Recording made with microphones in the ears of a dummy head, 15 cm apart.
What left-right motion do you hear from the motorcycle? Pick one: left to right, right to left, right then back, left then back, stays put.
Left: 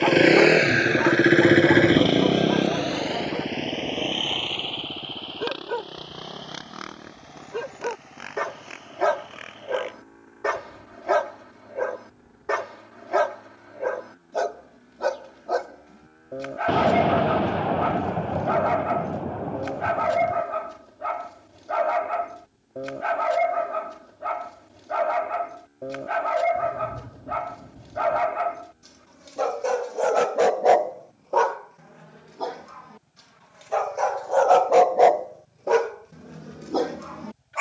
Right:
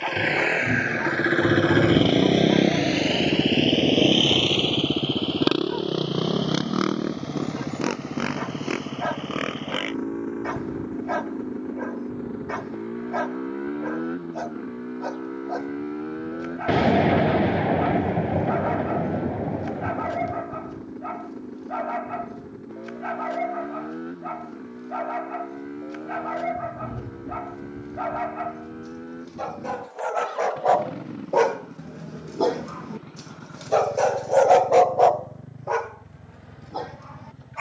left to right.